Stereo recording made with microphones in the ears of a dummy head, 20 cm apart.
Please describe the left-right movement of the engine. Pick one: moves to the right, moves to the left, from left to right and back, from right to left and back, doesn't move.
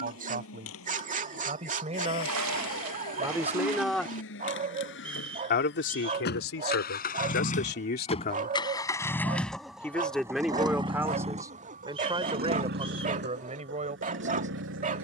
moves to the right.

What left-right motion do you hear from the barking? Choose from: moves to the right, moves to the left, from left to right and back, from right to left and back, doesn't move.
doesn't move.